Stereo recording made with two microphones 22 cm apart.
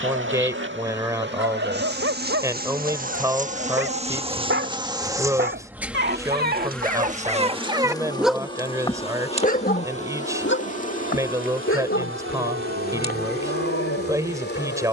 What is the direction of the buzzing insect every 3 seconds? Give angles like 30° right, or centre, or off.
50° right, 20° right, 10° left, 30° left, 50° left.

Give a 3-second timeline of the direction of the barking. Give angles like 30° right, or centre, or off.
70° right, 60° right, 30° right, 60° left, 80° left.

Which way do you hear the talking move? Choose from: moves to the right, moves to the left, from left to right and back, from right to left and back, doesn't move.
doesn't move.